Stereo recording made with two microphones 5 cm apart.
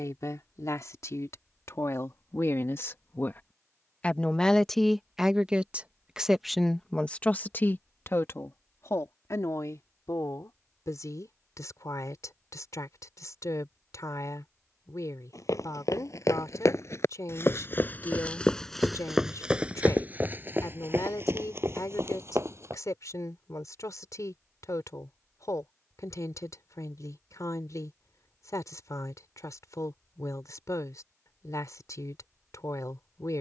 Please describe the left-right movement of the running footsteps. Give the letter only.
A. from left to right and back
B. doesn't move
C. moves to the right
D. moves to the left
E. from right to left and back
C.